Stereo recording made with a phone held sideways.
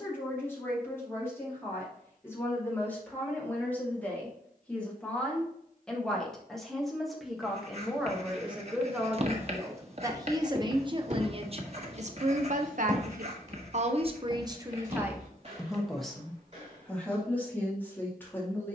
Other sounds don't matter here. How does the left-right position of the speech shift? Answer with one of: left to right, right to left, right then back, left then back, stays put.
right then back.